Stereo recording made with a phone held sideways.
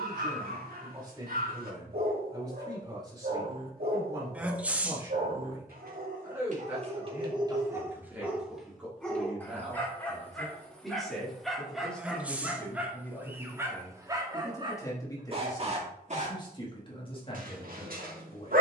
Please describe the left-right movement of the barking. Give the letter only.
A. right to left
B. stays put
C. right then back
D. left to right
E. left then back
E.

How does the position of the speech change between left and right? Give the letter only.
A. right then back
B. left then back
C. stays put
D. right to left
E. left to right
D.